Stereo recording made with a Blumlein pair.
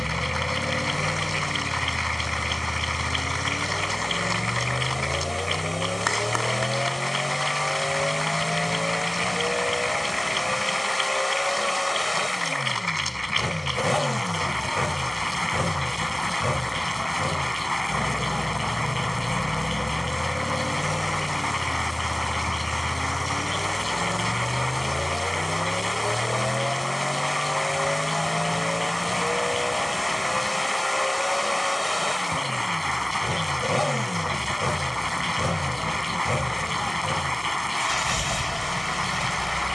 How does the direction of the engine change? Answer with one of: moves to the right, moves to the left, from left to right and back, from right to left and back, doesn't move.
doesn't move.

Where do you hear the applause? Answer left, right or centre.
centre.